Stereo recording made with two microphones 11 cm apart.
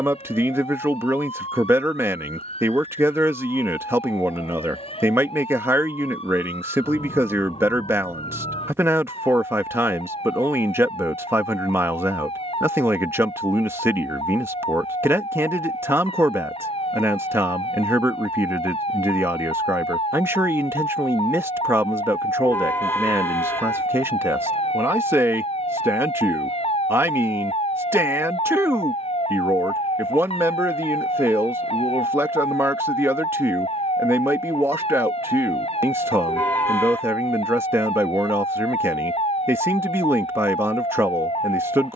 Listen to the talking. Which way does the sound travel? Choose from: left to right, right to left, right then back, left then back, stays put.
stays put.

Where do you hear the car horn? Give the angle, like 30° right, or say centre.
20° left.